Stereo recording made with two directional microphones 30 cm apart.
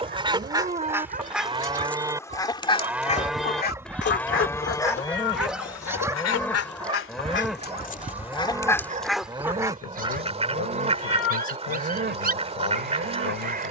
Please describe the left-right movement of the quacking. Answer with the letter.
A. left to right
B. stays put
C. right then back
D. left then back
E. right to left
D.